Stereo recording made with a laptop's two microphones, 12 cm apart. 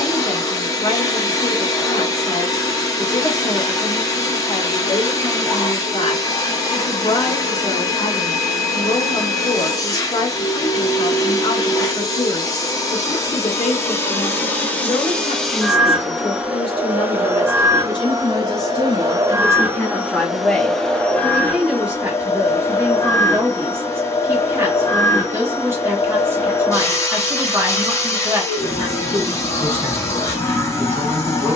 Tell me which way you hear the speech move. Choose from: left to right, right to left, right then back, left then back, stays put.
left to right.